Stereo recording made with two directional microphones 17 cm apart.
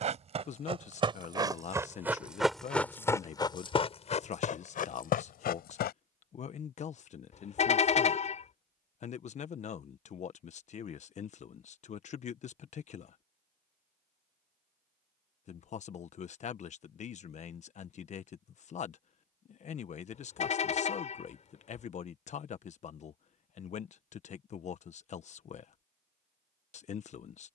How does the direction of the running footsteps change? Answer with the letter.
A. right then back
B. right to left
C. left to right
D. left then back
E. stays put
B.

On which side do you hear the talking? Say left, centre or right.
left.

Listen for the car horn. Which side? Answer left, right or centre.
left.